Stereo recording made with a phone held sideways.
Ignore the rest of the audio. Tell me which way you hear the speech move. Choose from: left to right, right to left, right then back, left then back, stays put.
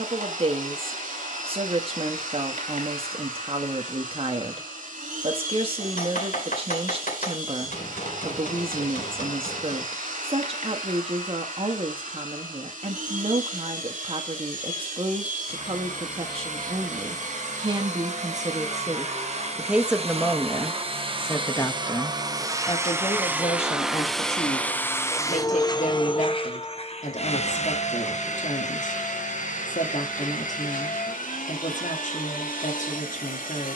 right to left.